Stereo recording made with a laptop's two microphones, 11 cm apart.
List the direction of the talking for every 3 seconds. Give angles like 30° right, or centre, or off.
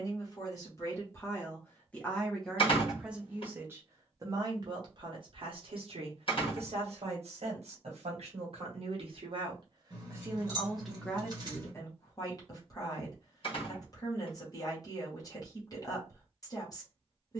20° left, 40° right, 60° right, 10° right, 30° left, 30° left.